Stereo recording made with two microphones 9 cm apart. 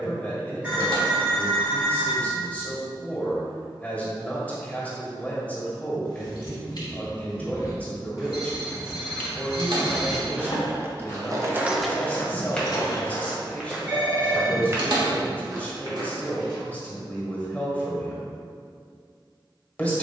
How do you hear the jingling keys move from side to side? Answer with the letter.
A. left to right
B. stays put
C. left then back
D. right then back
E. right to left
D.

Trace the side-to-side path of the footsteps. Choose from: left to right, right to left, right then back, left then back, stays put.
left to right.